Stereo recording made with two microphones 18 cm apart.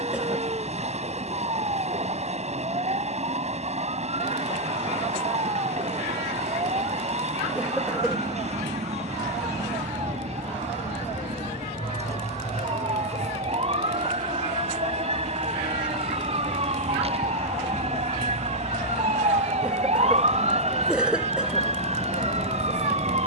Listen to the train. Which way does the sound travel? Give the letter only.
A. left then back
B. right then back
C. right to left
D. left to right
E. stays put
E.